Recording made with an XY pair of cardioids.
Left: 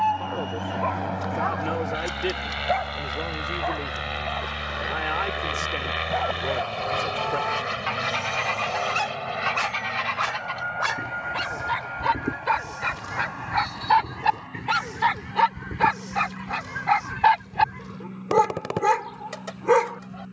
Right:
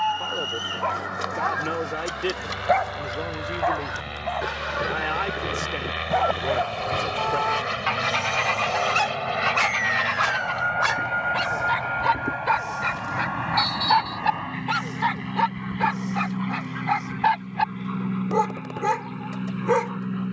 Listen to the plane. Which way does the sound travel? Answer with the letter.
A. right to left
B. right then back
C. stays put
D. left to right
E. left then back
D.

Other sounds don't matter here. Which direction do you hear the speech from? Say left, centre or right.
centre.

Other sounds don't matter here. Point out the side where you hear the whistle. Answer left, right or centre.
right.